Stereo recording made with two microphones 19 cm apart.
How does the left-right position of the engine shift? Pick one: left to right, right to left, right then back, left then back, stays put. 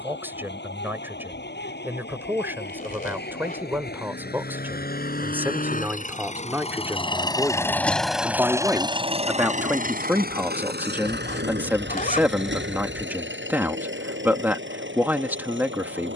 left to right.